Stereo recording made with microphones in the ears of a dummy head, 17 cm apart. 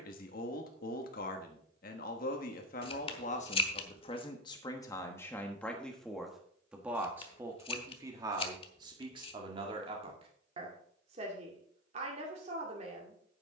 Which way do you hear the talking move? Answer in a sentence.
In this clip you hear the talking go from the left side to the right.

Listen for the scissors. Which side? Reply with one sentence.
You can hear the scissors on the left.